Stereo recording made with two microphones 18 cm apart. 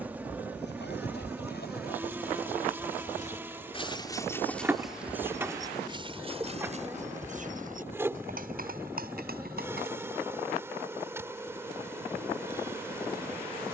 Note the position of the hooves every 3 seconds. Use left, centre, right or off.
left, centre, right, right, off.